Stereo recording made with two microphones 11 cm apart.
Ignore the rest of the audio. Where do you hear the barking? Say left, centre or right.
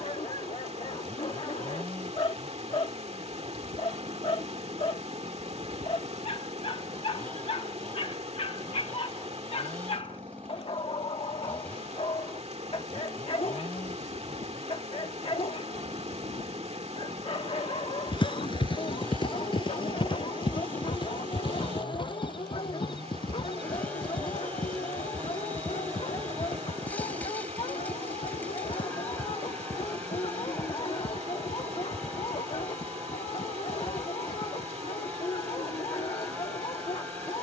left.